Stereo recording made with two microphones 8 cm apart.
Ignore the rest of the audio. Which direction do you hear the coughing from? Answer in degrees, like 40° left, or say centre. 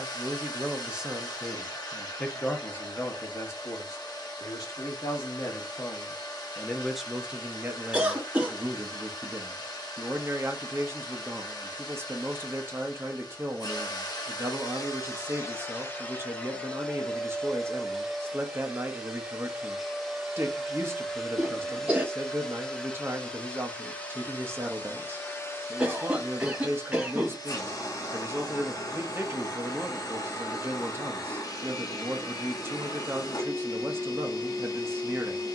10° right.